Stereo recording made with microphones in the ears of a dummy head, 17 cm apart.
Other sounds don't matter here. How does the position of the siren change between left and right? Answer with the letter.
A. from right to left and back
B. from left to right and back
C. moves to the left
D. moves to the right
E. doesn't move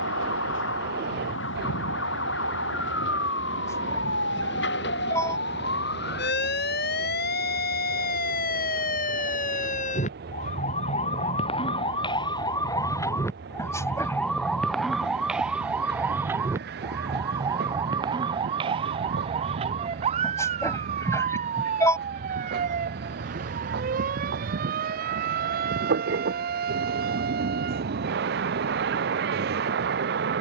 D.